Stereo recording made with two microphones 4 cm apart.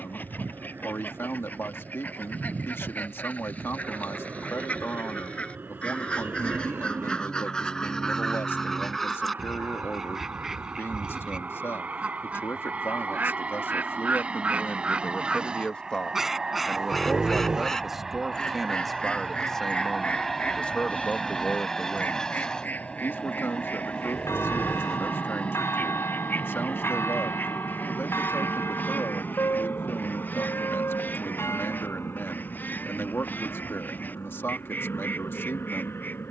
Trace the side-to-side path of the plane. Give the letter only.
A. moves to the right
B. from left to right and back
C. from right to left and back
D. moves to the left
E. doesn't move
D.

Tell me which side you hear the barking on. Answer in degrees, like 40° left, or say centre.
20° right.